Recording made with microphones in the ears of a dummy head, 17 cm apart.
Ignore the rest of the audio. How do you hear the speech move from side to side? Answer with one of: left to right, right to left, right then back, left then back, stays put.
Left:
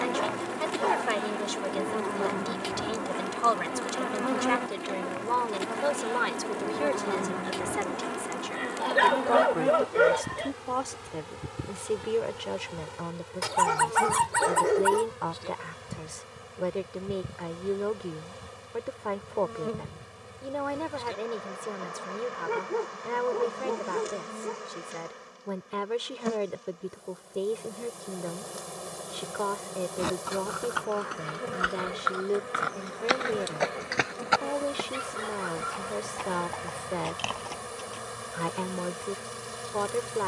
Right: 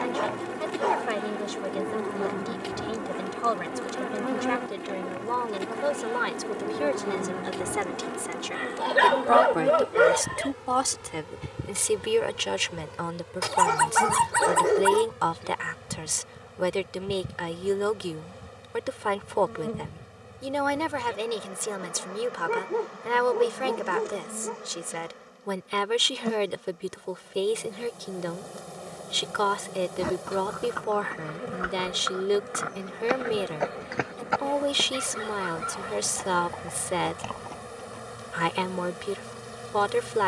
left to right.